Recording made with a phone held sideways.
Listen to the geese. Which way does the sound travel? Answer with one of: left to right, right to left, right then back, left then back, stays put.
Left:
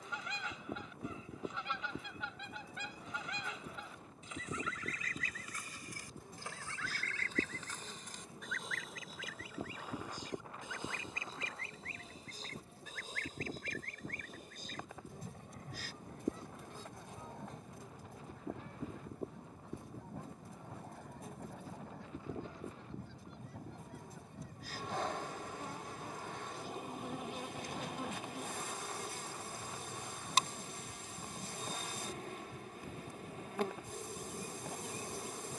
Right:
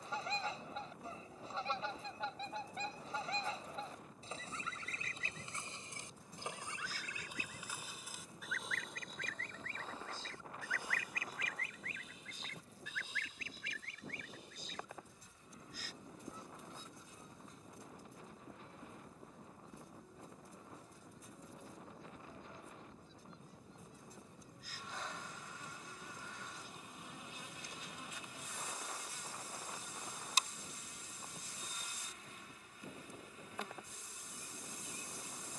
right to left.